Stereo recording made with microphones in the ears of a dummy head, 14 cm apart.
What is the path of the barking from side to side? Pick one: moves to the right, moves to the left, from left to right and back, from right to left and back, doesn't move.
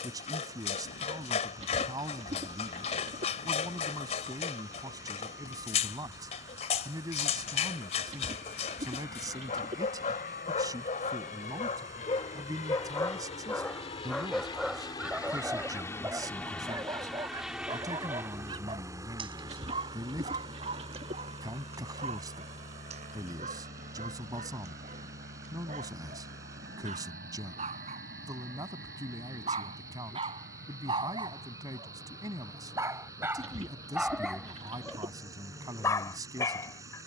from left to right and back.